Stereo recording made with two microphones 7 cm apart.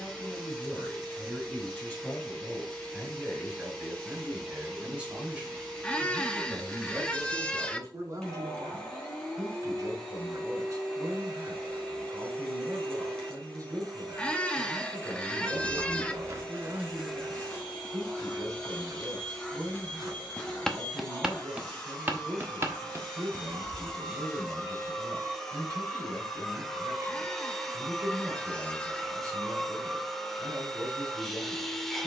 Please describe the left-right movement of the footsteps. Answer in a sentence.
You can hear the footsteps go left and come back.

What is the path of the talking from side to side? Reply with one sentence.
You can hear the talking move from left to right.